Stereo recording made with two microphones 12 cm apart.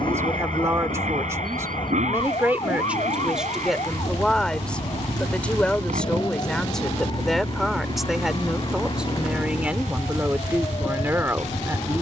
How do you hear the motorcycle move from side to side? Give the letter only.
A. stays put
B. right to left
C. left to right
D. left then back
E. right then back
A.